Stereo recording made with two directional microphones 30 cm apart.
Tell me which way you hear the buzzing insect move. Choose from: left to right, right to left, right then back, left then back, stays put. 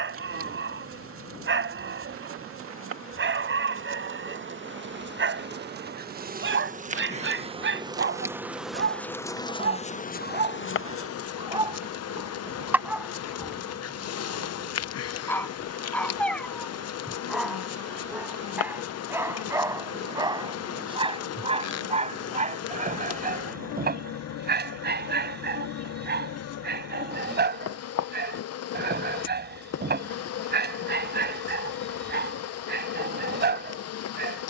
right to left.